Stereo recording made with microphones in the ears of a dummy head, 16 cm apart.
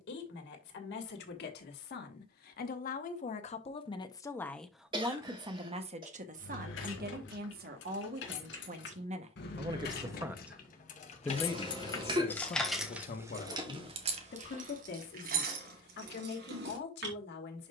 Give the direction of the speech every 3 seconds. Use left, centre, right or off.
left, centre, right, centre, left, left.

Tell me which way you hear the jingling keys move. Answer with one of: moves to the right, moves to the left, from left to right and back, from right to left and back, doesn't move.
moves to the right.